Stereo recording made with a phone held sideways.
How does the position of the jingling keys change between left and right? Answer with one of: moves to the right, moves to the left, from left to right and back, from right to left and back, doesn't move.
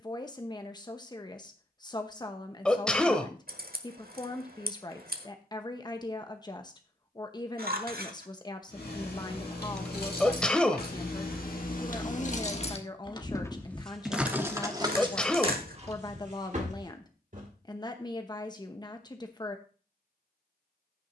moves to the right.